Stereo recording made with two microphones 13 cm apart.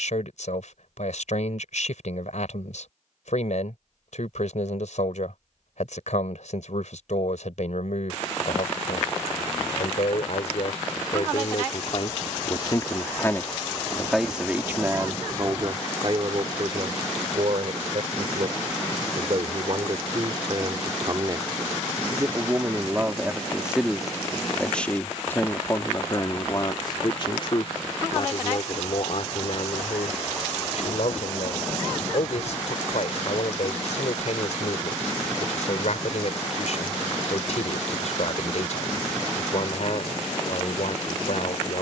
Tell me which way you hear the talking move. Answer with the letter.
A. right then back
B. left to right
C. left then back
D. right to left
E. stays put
A.